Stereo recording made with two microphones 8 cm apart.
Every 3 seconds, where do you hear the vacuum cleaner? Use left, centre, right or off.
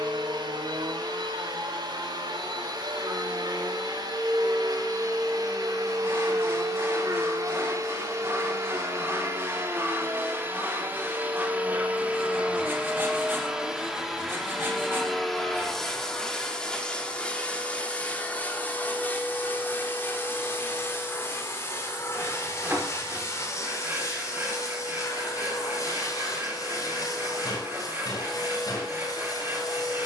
right, right, right, right, centre, centre, left, left, left, left.